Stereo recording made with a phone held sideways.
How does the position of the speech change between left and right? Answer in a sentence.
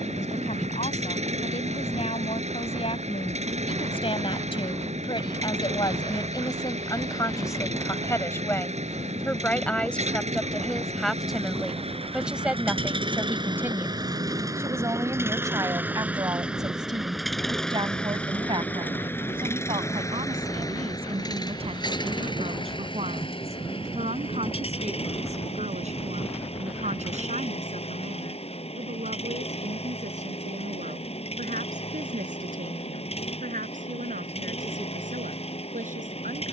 In this clip you hear the speech move from left to right.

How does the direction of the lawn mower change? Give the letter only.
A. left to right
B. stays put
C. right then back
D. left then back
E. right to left
E.